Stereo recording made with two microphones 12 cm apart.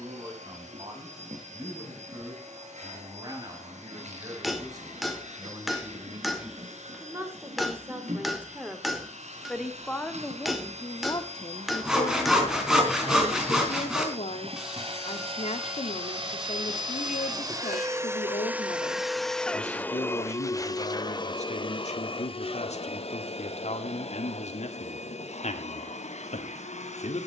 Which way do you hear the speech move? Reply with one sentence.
You can hear the speech move from right to left.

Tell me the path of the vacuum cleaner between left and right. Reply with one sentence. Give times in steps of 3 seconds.
In this clip you hear the vacuum cleaner on the right from 0 s, in the centre from 18 s and on the left from 21 s.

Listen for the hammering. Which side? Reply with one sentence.
In this clip you hear the hammering in the centre.